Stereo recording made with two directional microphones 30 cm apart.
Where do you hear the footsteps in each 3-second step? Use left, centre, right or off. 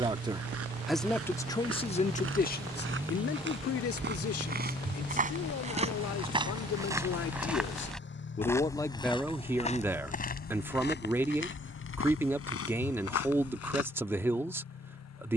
right, right, centre, left, left.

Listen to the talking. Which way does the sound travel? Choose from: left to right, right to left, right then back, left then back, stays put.
left then back.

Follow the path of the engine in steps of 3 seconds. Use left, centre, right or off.
right, centre, left, left, left.